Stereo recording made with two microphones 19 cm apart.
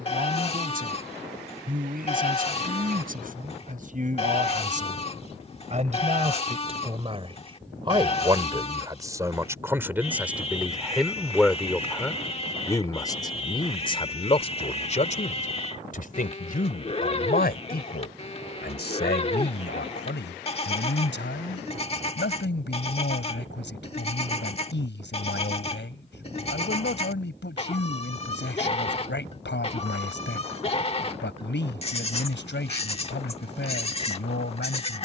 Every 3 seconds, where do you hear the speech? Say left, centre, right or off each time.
right, right, right, centre, left, left, left, left, left, left, left, left.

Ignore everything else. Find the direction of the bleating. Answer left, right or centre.
left.